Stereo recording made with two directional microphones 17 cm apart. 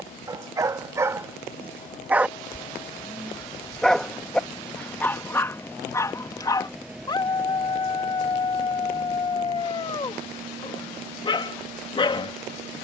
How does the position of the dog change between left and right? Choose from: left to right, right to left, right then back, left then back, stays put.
right to left.